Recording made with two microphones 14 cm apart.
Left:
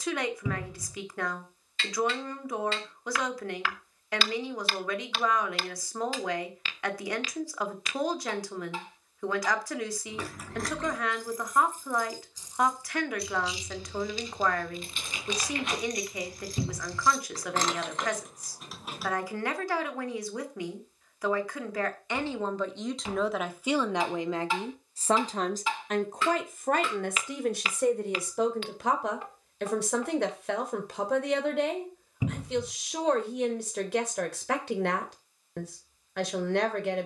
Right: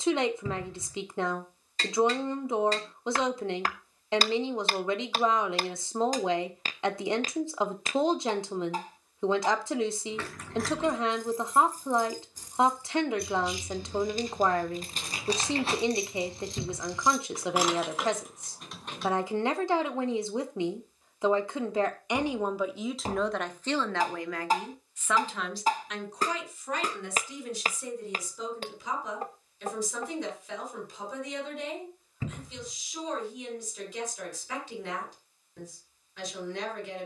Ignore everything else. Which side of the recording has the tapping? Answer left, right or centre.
right.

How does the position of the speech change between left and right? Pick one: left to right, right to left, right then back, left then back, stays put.
right to left.